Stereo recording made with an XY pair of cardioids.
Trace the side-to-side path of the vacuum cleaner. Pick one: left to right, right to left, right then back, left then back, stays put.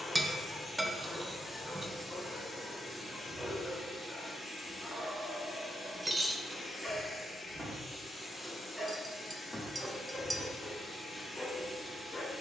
stays put.